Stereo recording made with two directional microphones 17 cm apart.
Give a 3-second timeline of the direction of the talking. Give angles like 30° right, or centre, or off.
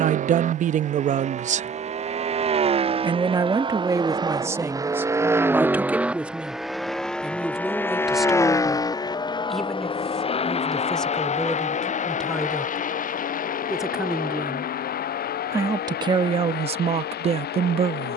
40° right, 20° right, centre, centre, centre, 30° right.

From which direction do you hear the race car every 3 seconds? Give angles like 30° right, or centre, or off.
40° right, 20° right, 10° left, 30° left, 50° left, 60° left.